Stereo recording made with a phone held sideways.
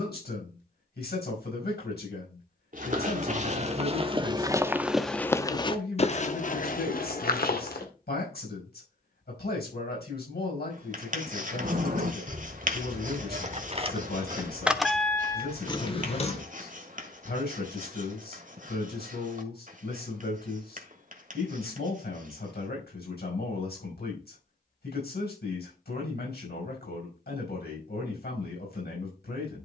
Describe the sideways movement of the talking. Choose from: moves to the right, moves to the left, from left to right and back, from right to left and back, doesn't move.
doesn't move.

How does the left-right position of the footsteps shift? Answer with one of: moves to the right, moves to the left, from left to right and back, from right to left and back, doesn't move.
moves to the left.